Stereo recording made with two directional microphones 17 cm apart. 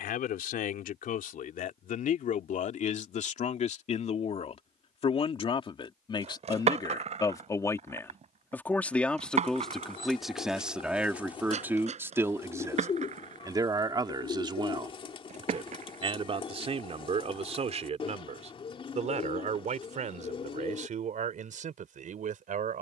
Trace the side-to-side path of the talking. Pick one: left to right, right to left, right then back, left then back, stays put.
left to right.